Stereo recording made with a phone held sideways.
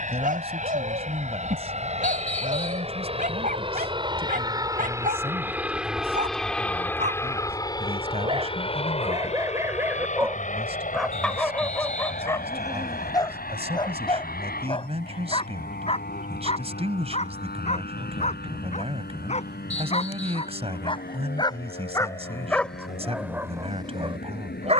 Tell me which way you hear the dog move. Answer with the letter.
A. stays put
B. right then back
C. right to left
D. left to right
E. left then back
E.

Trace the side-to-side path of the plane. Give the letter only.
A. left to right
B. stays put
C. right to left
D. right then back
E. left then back
C.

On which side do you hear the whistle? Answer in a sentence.
You can hear the whistle on the left.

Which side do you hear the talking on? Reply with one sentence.
In this clip you hear the talking on the right.